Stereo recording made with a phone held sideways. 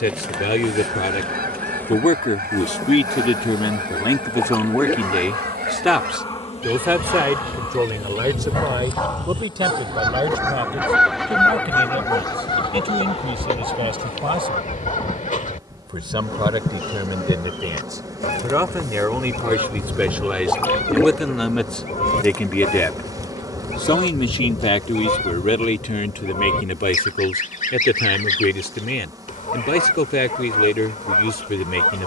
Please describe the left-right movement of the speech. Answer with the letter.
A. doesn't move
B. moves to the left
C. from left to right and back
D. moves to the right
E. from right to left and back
C.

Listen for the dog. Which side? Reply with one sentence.
You can hear the dog on the left.